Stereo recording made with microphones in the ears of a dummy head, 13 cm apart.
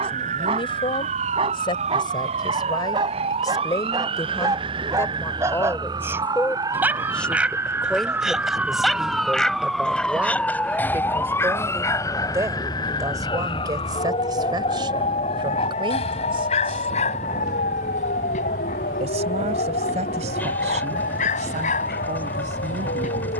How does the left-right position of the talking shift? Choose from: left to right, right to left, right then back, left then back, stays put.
left to right.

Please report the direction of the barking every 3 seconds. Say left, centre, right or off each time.
right, right, centre, centre, left, left, left, left.